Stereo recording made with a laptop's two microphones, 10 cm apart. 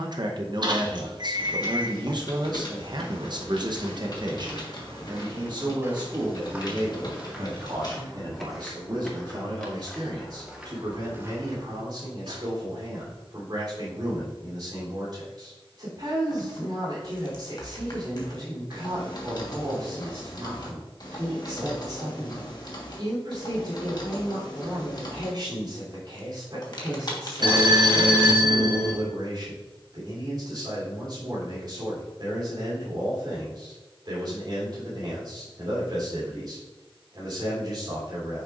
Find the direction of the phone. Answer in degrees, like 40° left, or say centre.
50° right.